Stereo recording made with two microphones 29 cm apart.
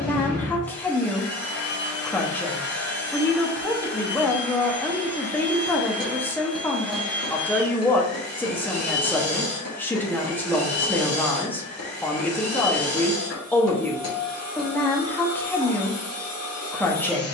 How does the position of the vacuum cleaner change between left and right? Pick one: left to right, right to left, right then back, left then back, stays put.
stays put.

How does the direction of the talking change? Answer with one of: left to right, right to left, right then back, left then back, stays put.
stays put.